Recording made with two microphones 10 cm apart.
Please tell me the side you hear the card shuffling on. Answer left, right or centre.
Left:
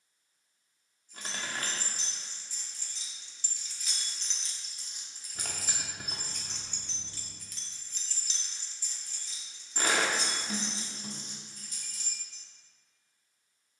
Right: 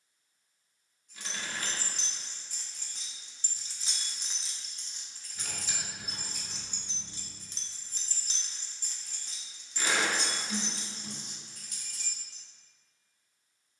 left.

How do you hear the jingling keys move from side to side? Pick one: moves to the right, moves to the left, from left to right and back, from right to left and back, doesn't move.
from right to left and back.